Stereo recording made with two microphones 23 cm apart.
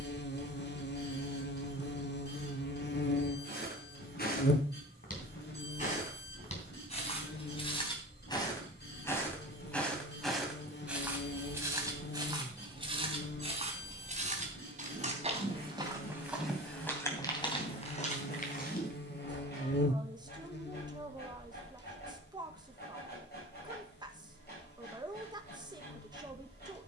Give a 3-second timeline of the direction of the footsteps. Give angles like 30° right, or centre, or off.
off, 40° left, 30° left, centre, 30° right, centre, 40° left, off, off.